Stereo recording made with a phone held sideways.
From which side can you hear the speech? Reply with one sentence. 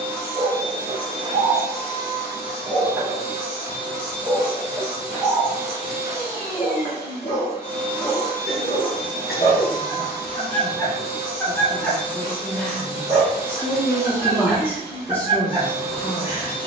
In this clip you hear the speech in the centre.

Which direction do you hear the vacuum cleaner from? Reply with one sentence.
In this clip you hear the vacuum cleaner on the right.